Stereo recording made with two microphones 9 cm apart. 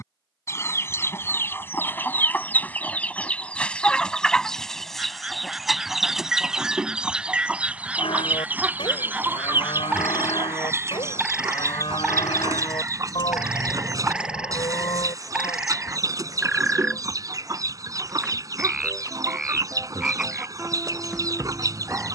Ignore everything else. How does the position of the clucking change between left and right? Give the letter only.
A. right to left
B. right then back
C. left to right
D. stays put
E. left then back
C.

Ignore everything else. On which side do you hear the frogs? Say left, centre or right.
centre.